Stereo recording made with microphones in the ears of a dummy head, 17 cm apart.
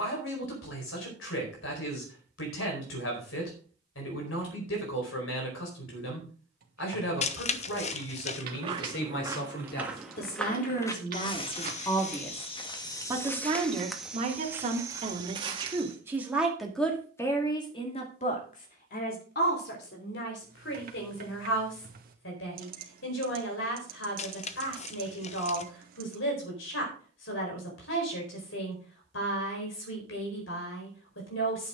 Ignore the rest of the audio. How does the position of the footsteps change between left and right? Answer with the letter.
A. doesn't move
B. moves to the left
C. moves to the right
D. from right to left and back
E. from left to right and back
D.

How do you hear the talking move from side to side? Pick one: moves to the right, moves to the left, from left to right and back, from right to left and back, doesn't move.
from left to right and back.